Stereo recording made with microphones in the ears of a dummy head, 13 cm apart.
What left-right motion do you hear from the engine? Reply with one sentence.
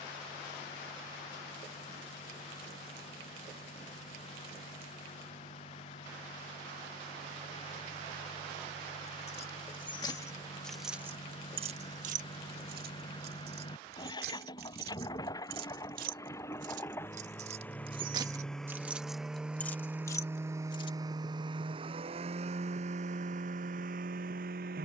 You can hear the engine go from the left side to the right.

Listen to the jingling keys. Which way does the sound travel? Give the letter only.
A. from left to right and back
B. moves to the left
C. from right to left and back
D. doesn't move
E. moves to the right
A.